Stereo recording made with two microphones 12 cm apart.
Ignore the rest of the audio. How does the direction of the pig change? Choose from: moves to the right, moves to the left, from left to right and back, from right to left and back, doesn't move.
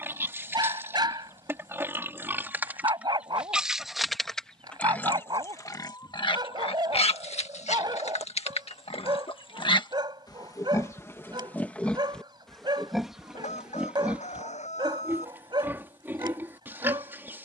from right to left and back.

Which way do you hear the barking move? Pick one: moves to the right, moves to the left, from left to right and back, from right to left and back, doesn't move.
doesn't move.